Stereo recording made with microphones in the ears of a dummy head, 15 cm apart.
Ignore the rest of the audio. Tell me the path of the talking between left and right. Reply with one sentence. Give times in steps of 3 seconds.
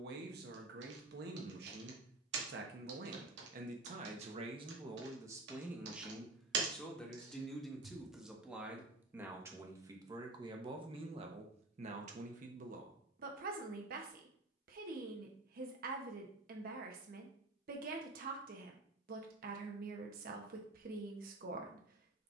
In this clip you hear the talking on the right from 0 s, in the centre from 6 s and on the right from 9 s.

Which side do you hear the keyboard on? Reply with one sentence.
You can hear the keyboard on the right.